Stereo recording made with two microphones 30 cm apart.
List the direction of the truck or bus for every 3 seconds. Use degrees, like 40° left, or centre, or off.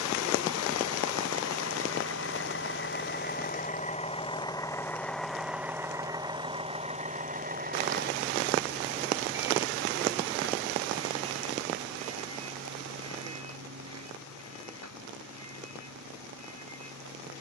50° left, 10° left, 30° right, 50° right, 50° right, 60° right.